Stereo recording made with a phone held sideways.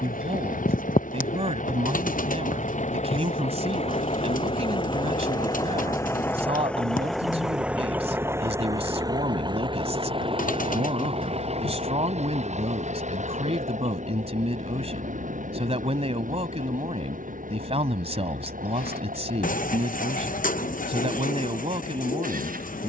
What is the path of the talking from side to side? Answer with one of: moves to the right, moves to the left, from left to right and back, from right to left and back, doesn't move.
doesn't move.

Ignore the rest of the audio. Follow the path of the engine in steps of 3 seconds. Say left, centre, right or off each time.
left, left, centre, right, right, right, right, right.